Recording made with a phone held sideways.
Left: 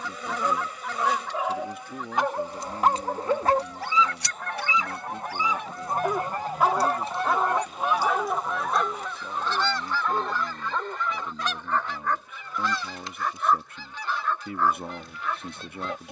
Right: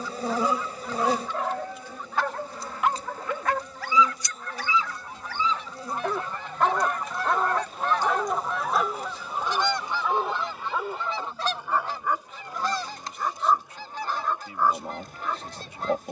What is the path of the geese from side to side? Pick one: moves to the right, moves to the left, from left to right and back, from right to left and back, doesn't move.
moves to the right.